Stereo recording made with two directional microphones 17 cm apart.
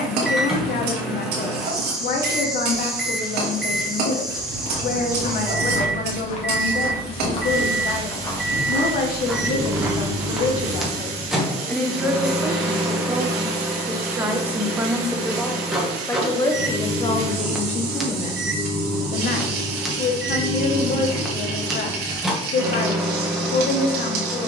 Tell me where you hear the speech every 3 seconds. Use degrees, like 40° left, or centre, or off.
60° left, 60° left, 60° left, 50° left, 20° right, 20° left, 60° left, 60° left.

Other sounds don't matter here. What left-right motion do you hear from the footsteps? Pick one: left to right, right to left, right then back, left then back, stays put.
left to right.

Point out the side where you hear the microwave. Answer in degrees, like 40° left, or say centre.
centre.